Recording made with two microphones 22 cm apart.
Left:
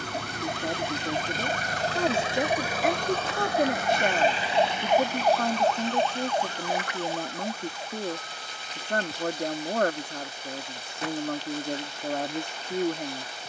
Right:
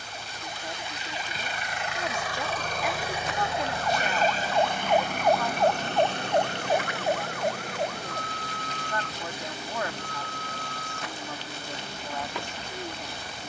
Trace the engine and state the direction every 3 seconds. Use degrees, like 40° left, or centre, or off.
40° left, 40° right, 70° right, 70° right, 80° right.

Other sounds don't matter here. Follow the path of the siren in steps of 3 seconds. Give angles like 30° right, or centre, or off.
60° left, 20° left, 50° right, 70° right, 80° right.